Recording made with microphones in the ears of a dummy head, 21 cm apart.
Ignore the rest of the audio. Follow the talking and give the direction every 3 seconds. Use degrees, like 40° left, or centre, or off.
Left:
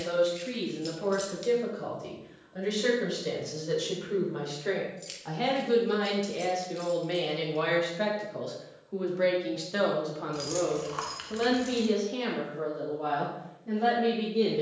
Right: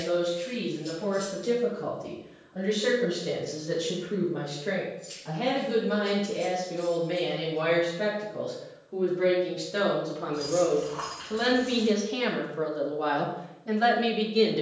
60° left, 50° left, 40° left, 10° left, 40° right.